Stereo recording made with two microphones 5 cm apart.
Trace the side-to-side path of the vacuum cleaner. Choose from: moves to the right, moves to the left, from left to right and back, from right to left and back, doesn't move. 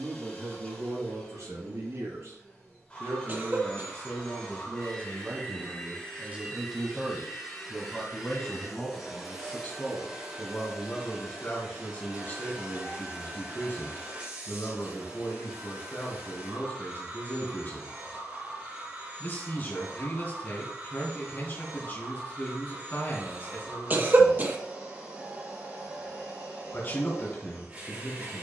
moves to the right.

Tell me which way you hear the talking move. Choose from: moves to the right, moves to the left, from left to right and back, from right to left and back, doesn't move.
moves to the left.